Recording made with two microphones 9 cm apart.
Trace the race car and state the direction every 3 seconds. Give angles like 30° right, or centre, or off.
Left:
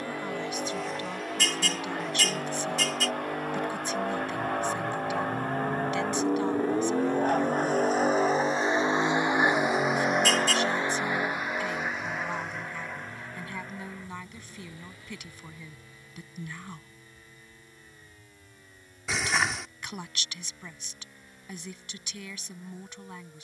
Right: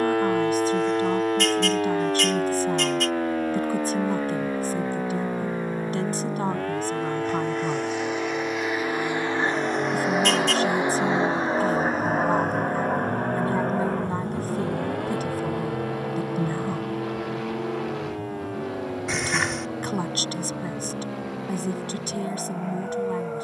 80° left, 70° left, 50° left, 10° right, 50° right, 70° right, 70° right, 80° right.